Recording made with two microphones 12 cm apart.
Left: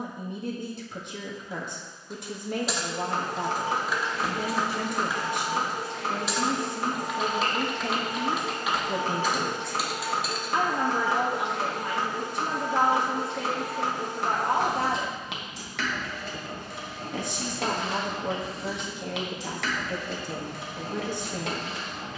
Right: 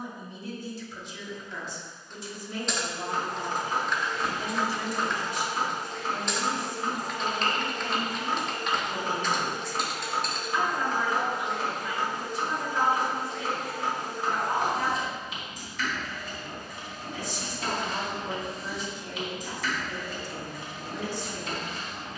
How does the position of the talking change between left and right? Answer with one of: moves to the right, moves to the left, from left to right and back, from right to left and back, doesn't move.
doesn't move.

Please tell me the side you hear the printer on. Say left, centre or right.
left.